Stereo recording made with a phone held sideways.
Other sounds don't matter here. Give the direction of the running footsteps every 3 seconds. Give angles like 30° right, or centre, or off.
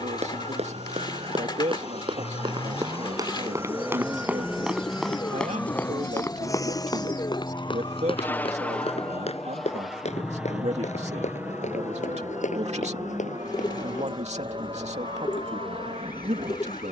50° right, 10° right, 30° left, 60° left, 70° left, off.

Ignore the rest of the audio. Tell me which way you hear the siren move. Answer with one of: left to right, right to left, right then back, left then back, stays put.
right to left.